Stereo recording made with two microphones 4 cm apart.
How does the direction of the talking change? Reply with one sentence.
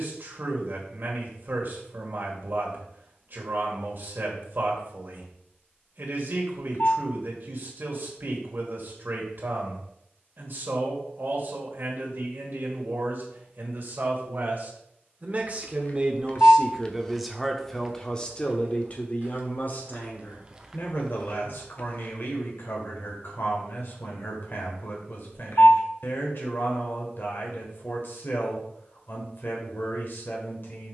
You can hear the talking move from right to left.